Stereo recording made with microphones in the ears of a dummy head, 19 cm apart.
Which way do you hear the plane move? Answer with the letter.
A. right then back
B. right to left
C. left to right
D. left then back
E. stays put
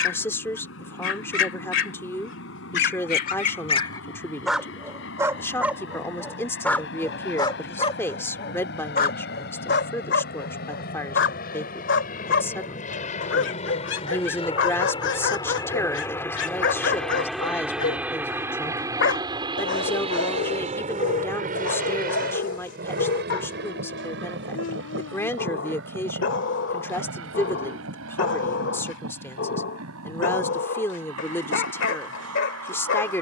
C.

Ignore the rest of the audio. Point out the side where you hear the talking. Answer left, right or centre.
centre.